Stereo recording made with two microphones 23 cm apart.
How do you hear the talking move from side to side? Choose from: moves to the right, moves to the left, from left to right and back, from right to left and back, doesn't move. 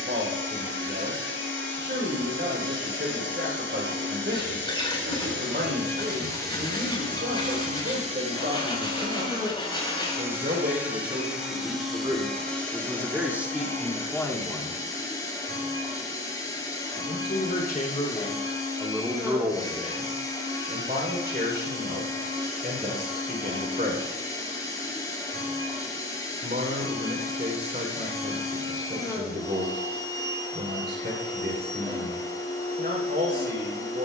from right to left and back.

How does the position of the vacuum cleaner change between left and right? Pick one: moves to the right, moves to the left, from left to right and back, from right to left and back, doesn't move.
moves to the left.